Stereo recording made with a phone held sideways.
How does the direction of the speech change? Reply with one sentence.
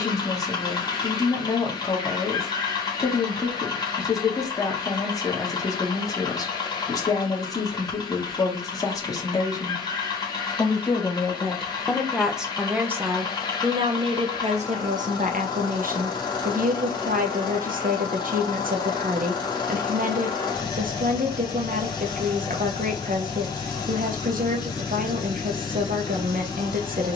In this clip you hear the speech travel towards the right.